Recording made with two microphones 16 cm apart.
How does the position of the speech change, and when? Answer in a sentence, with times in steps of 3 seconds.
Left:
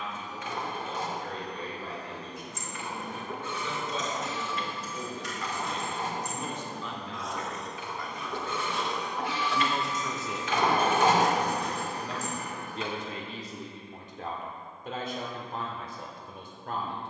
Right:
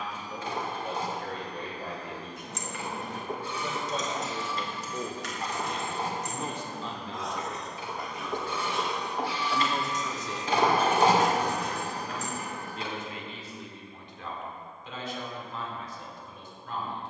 In this clip you hear the speech on the right from 0 s, in the centre from 9 s and on the left from 12 s.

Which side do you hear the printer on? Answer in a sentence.
You can hear the printer on the right.